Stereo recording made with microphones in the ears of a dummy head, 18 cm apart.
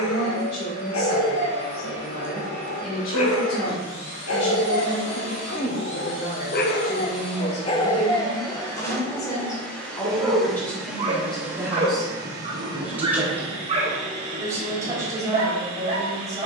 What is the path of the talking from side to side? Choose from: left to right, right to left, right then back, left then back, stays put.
left to right.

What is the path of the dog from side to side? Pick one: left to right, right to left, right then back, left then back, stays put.
left to right.